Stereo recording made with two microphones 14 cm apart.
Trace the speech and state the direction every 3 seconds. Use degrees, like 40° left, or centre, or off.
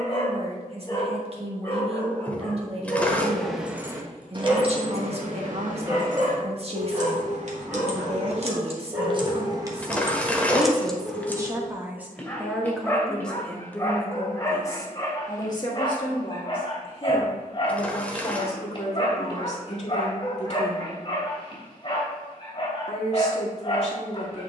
40° right, 40° right, 40° right, 30° right, 10° left, 40° left, 50° left, 50° left.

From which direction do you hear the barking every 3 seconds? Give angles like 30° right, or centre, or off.
20° left, 10° right, 10° right, centre, 20° left, 30° left, 30° left, 30° left.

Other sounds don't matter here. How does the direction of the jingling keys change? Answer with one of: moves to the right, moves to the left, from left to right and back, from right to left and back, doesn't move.
from left to right and back.